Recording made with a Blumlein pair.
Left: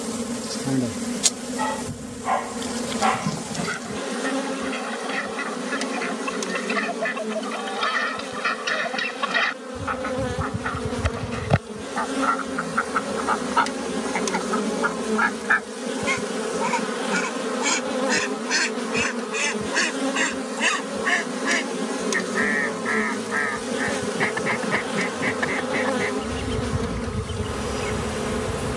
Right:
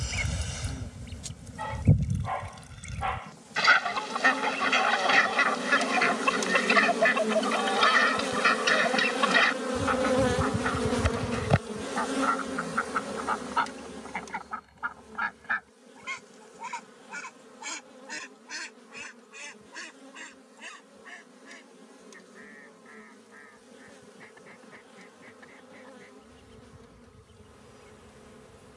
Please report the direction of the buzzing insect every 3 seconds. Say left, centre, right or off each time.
left, left, centre, centre, left, left, left, left, left, left.